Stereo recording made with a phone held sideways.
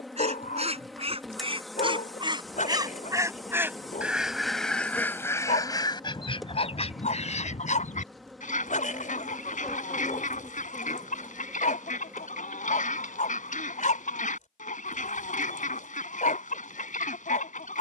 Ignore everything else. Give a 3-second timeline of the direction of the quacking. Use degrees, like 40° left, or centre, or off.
40° right, 10° left, 50° left, 60° left, 60° left, 60° left.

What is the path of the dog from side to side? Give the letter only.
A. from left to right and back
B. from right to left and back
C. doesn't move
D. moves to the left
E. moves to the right
C.